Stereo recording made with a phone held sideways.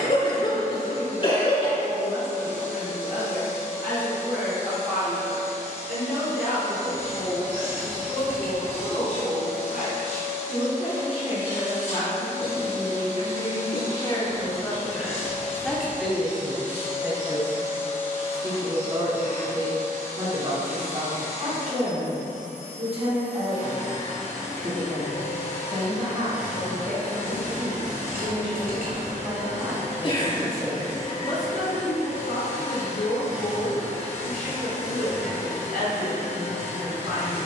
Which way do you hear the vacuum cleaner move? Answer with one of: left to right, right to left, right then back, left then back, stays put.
stays put.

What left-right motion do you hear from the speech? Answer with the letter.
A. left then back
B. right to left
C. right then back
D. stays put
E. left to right
C.